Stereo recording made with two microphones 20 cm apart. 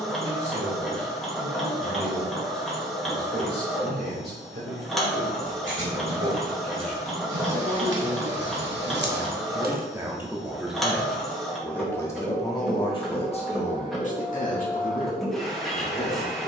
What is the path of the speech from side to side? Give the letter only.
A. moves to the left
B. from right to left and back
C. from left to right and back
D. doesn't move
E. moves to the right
A.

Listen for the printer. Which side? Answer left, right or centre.
centre.